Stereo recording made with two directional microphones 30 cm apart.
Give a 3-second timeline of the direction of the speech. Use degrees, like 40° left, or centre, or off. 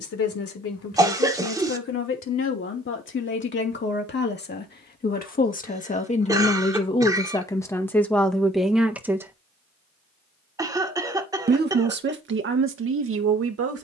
50° left, 30° left, 10° left, 20° right, 50° right.